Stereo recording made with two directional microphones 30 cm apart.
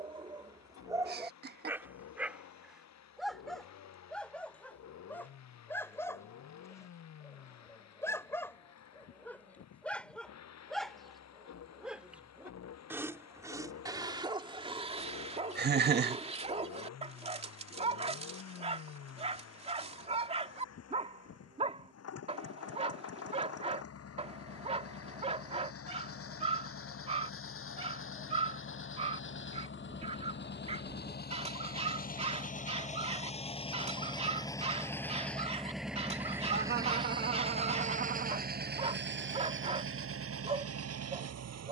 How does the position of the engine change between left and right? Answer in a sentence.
In this clip you hear the engine move from left to right.